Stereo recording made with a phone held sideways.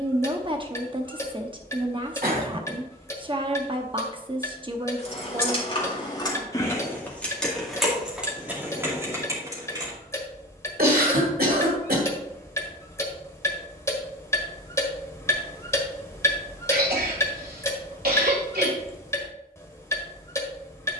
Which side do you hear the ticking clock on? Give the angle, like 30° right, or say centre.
20° left.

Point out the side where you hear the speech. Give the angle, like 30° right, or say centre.
30° right.